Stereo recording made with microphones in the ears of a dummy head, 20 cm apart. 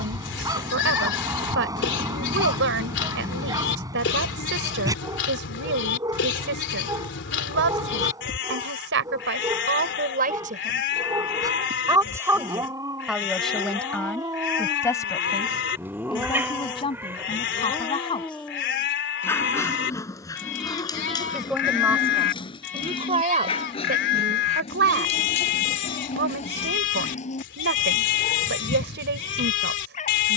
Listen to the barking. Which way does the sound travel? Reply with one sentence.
You can hear the barking move to the left.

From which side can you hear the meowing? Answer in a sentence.
In this clip you hear the meowing in the centre.